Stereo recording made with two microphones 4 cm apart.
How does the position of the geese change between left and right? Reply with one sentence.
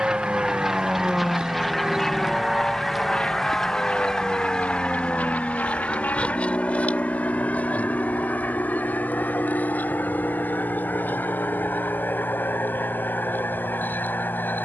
You can hear the geese travel towards the left.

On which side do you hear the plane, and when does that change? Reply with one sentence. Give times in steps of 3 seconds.
You can hear the plane in the centre from 0 s and on the left from 3 s.